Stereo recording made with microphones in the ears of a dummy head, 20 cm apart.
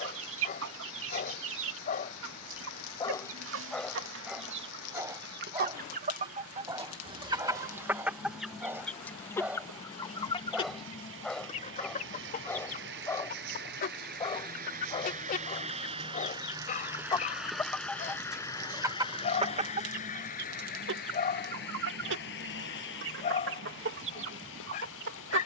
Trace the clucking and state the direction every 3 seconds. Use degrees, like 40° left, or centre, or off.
60° right, 60° right, 20° right, 20° left, 40° left, 20° left, 30° right, 60° right, 60° right.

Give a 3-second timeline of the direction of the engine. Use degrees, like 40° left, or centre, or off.
80° right, 80° right, 70° right, 70° right, 50° right, 20° right, 30° left, 50° left, 60° left.